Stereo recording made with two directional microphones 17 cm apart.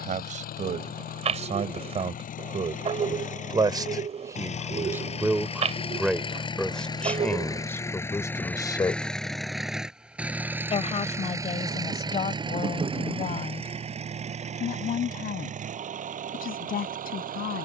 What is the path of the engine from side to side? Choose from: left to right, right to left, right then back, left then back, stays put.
left to right.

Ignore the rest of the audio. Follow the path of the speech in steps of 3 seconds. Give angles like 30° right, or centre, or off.
40° right, 20° right, 10° left, 40° left, 50° left, 60° left.